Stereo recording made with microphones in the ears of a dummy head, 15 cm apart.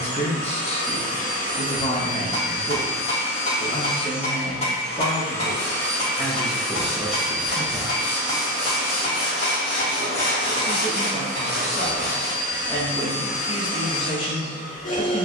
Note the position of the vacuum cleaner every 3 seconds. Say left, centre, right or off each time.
left, left, centre, centre, left.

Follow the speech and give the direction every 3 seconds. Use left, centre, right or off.
left, left, centre, centre, left.